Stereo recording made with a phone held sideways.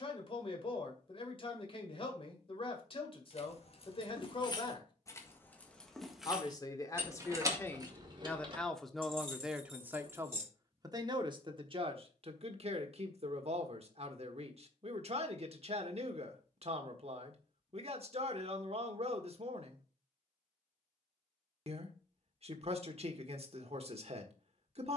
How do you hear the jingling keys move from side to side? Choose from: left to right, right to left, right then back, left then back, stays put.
left to right.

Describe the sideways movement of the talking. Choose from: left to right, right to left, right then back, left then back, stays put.
left to right.